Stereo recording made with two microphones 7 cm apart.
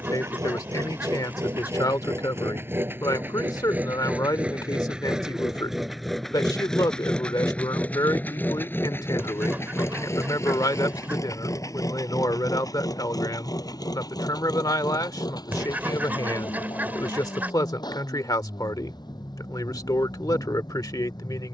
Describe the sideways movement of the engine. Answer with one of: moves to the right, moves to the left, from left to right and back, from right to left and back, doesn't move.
moves to the left.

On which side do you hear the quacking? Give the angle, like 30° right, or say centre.
20° right.